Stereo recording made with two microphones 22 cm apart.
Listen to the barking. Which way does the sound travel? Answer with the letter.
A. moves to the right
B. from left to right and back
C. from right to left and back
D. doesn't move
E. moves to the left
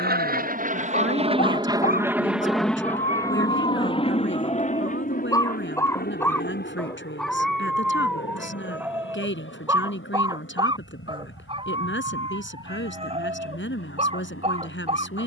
A.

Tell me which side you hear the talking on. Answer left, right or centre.
left.